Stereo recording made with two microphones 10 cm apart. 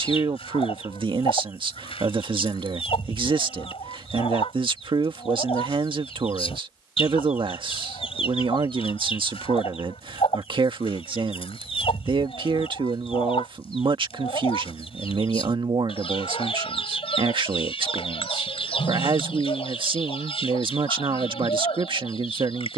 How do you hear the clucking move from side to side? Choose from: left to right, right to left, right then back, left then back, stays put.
stays put.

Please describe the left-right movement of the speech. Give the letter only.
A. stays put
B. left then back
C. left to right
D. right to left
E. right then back
A.